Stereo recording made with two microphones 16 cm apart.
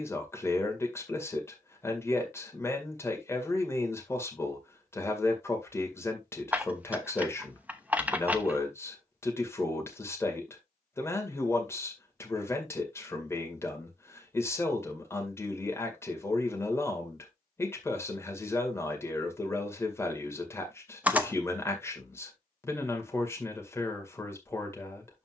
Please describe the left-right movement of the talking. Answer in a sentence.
You can hear the talking stay in one place.